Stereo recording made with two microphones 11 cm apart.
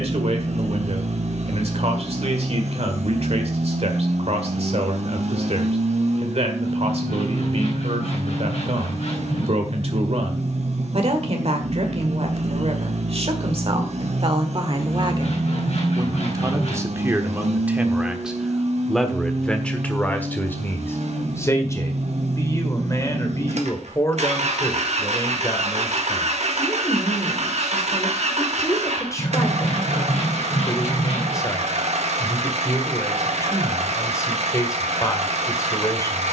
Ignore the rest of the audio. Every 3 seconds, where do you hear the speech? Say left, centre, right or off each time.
right, right, right, right, right, right, centre, left, left, left, left, left.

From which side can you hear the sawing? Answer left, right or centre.
left.